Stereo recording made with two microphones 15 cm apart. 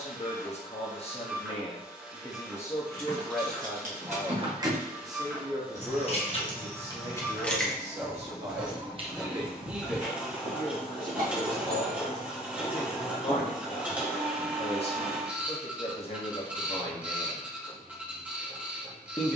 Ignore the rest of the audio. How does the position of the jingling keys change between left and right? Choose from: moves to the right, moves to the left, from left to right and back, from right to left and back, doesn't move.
from right to left and back.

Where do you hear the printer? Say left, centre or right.
centre.